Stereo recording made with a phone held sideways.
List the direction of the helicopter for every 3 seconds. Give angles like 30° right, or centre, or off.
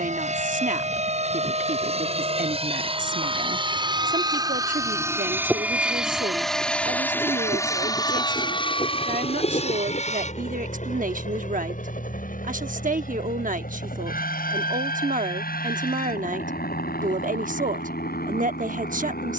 50° right, 30° right, 20° left, 50° left, 70° left, 70° left, 80° left.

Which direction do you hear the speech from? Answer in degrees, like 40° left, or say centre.
70° right.